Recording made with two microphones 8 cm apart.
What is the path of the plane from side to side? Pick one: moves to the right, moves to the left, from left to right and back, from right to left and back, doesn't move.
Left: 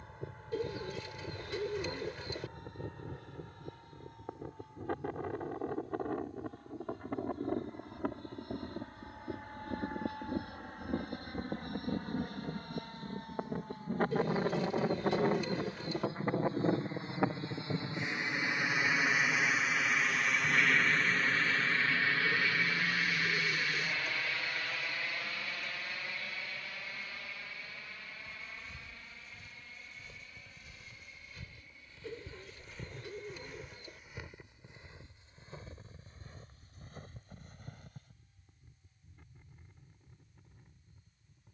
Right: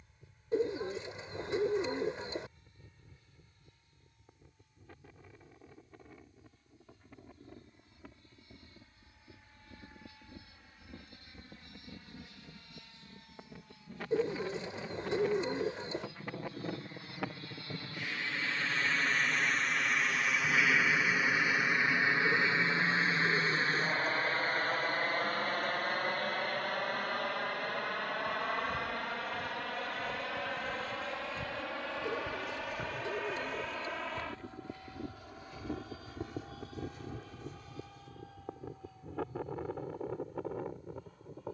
moves to the right.